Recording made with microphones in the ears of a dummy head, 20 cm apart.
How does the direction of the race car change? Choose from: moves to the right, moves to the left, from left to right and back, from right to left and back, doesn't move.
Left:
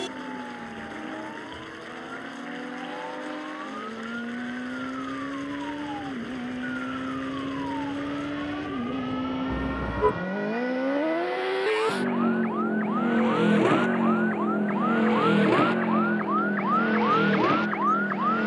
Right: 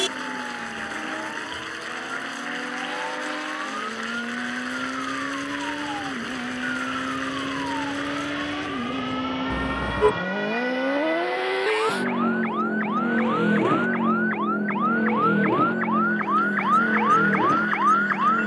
moves to the left.